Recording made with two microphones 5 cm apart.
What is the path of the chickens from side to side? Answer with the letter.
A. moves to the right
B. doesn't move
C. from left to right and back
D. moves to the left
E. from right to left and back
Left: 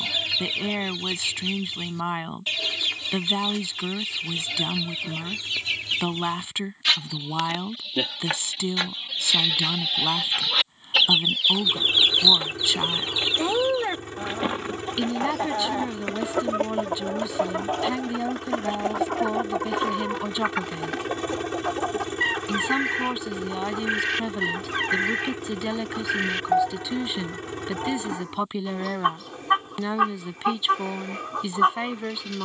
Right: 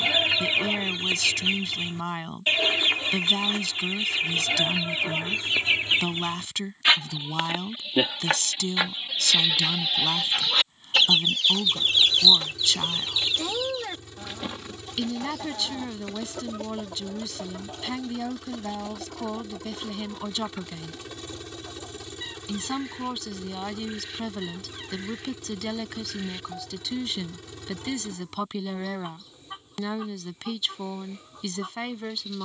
D.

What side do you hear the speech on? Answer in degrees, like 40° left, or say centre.
20° left.